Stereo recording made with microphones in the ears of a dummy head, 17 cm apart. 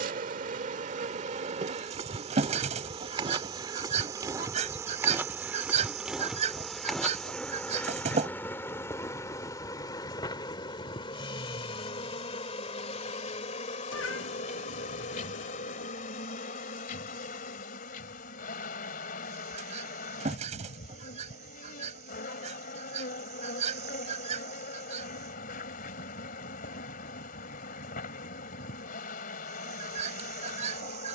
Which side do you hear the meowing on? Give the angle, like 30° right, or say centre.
70° left.